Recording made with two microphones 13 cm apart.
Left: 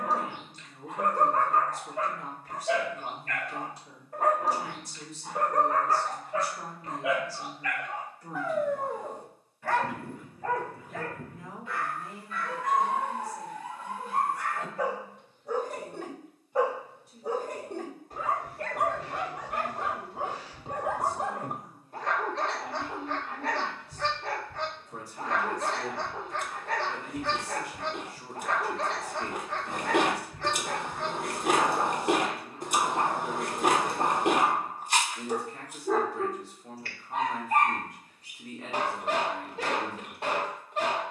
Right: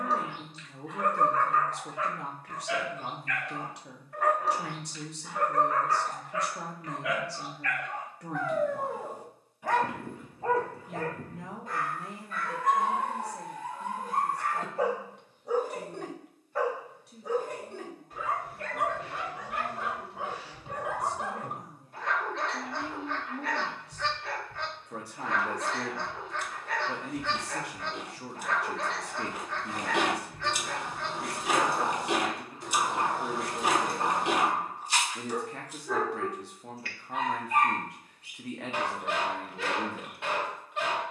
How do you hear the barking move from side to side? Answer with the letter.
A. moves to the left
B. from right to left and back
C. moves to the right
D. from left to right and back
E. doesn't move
D.